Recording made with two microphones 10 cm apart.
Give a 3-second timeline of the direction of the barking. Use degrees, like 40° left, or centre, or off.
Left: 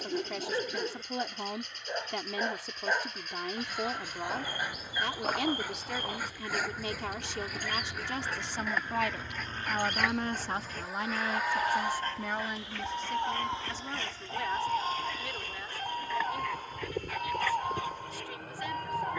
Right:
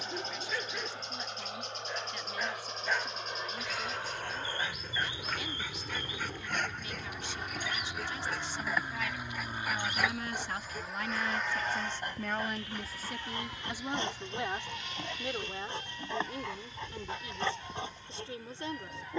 30° left, 10° left, centre, 10° right, 20° right, 30° right, 30° right.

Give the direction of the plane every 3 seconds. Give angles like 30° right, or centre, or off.
60° right, 50° right, 30° right, centre, 30° left, 50° left, 60° left.